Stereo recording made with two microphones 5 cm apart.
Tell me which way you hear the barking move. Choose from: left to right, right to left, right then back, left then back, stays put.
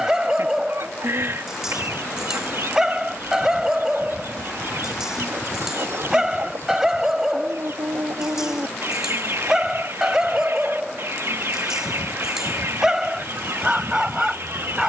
stays put.